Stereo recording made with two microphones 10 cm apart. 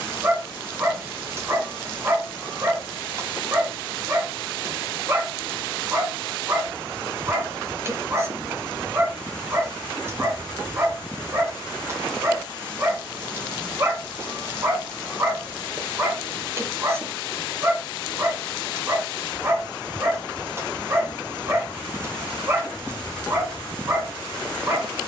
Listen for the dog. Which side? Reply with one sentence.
You can hear the dog on the right.